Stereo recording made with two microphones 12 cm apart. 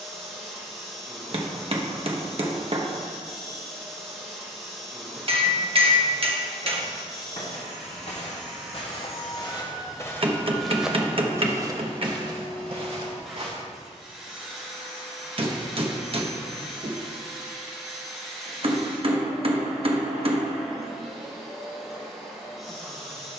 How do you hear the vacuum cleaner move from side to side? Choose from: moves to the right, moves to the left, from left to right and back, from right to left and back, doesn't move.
doesn't move.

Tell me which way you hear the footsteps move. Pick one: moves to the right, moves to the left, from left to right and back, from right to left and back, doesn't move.
moves to the right.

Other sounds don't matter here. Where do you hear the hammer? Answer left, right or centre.
right.